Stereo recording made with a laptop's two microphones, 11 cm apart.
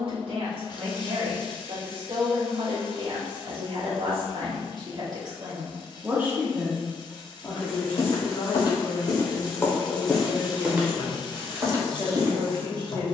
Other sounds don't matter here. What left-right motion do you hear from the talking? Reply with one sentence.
In this clip you hear the talking move from right to left and back again.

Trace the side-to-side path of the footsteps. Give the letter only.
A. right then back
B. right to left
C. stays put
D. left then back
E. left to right
E.